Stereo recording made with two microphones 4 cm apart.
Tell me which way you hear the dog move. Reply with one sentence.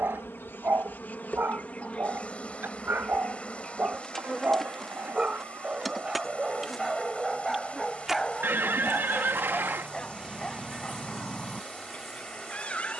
You can hear the dog move from right to left.